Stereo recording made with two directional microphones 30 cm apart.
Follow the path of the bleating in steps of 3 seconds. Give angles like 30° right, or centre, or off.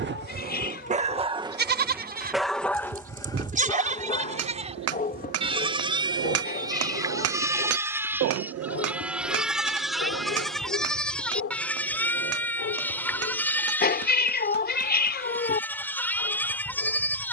30° right, 20° right, 10° right, centre, 10° left, 10° left.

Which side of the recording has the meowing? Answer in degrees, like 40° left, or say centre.
30° left.